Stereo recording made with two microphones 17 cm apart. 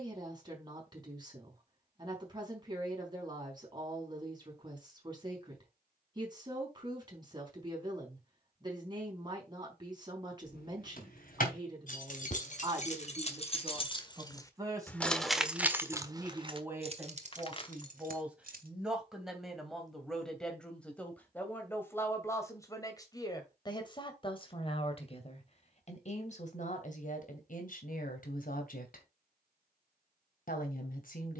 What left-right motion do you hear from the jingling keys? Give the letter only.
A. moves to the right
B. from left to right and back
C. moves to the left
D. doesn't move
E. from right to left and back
A.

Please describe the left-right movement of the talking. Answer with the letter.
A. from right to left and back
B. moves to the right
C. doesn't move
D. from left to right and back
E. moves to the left
E.